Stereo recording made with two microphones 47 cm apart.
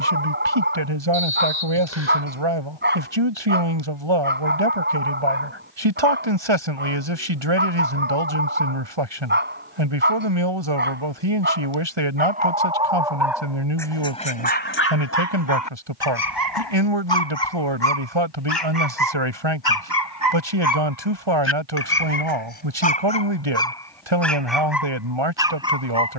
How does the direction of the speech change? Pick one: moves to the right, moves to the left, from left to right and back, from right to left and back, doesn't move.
doesn't move.